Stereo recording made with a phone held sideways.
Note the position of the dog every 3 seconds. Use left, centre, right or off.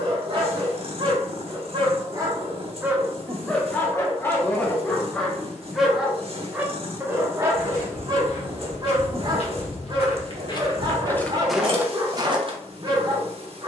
right, centre, right, right, right.